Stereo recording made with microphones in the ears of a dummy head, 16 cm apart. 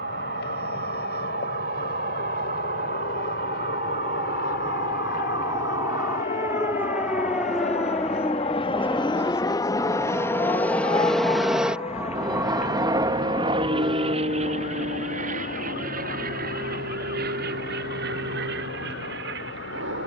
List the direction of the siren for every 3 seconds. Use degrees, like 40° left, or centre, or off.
50° right, 30° right, centre, 20° left, 40° left, 50° left, 60° left.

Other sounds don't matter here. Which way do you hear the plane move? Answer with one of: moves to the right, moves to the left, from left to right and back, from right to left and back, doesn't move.
moves to the right.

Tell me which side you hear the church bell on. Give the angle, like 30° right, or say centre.
20° right.